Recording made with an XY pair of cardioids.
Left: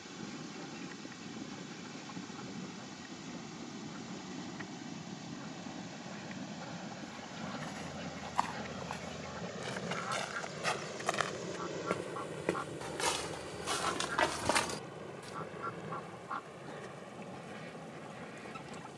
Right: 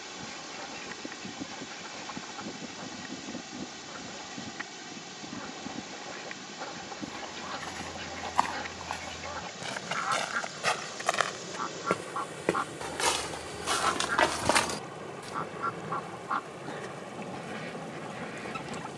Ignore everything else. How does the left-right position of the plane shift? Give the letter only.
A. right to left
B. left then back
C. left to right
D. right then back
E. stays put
C.